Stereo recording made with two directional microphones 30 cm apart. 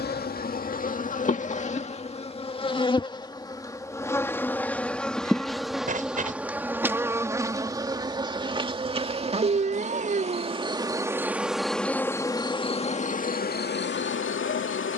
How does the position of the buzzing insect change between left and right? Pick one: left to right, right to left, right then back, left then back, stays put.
right then back.